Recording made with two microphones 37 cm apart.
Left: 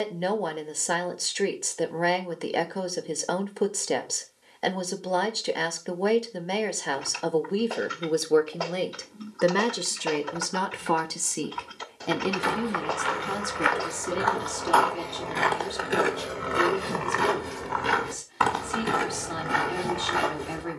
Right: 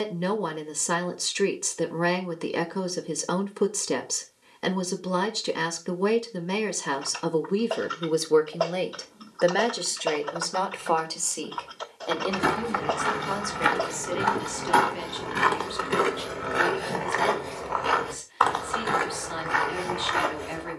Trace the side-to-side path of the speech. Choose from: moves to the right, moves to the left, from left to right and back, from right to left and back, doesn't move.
moves to the left.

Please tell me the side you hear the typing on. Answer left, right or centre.
left.